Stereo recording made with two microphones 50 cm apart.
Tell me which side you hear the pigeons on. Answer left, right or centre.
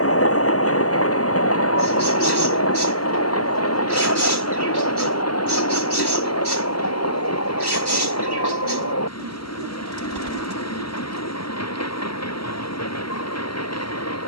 right.